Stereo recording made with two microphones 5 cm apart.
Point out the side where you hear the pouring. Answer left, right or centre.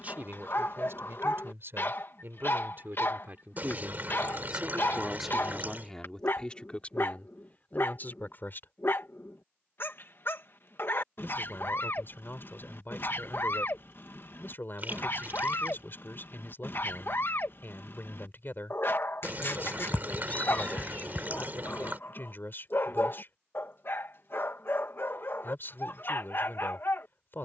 right.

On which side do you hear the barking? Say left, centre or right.
left.